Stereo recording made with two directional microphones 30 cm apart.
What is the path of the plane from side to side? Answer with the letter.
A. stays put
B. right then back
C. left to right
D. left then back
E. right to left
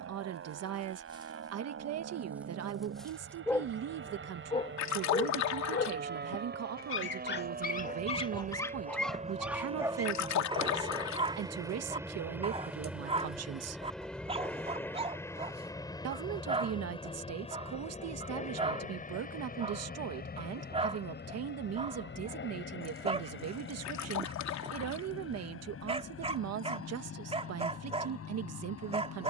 E.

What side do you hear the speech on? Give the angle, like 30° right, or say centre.
60° right.